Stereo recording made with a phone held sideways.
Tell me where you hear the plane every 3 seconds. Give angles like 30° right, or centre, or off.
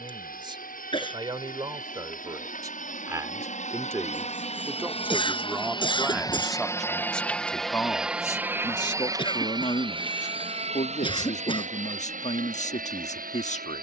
60° left, 40° left, centre, 30° right, 50° right.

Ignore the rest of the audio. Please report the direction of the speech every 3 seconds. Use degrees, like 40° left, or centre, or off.
30° right, 10° right, 10° left, 40° left, 50° left.